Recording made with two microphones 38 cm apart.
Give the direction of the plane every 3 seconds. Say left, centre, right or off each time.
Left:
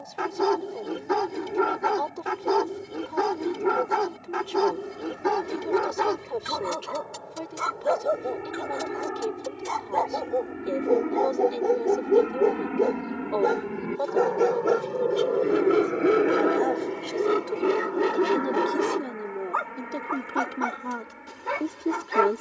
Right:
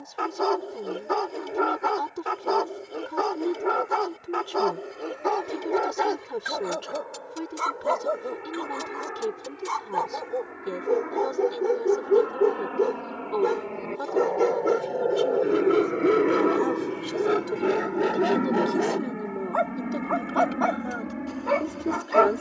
left, left, left, left, left, centre, right, right.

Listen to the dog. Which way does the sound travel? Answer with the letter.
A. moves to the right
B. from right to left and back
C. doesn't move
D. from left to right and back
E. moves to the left
D.